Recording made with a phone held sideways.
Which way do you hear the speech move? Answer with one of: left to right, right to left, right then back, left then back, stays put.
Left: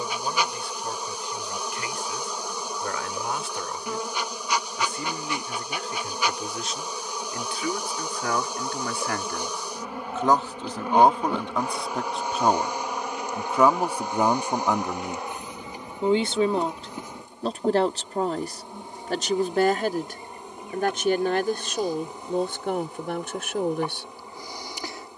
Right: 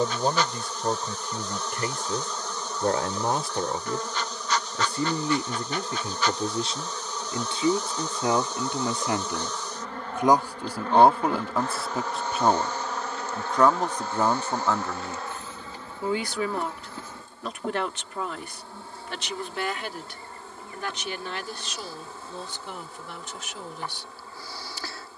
right to left.